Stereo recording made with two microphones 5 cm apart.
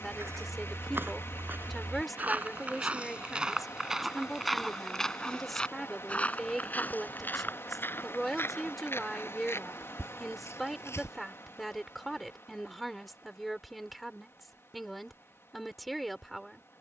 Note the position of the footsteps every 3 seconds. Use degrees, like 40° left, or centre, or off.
40° right, centre, 40° left, 60° left, off, off.